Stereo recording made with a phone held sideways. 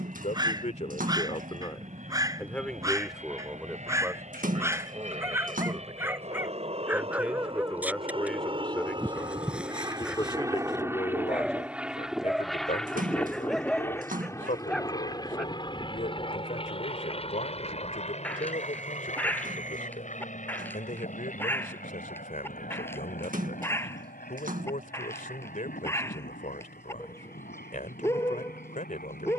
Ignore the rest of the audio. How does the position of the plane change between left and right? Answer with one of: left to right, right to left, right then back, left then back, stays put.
right to left.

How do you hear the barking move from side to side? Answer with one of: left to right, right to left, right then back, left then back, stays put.
right to left.